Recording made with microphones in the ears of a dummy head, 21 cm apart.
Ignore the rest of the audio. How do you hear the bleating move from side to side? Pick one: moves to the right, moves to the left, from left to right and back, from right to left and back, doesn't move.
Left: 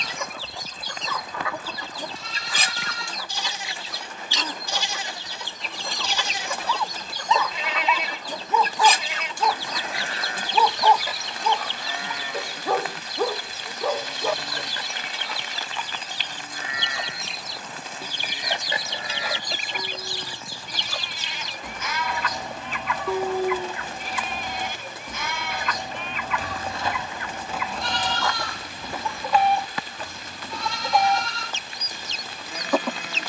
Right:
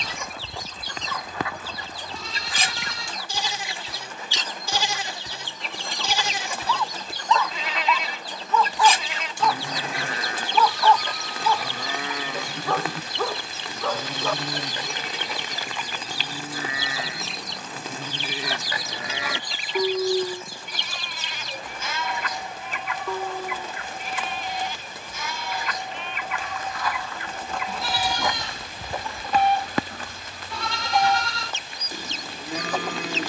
from right to left and back.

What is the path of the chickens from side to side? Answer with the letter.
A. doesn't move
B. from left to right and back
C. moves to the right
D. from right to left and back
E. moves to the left
B.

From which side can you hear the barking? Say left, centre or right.
centre.